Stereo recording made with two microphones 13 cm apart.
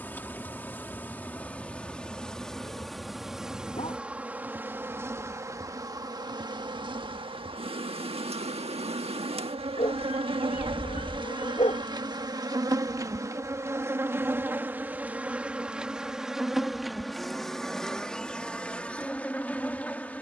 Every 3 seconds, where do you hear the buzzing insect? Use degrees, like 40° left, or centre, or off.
10° left, 10° right, 40° right, 40° right, 20° right, centre, 10° left.